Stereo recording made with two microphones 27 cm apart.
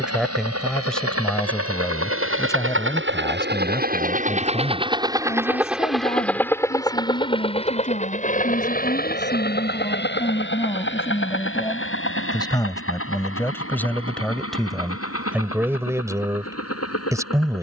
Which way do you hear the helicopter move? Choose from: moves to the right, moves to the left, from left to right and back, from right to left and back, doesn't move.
moves to the left.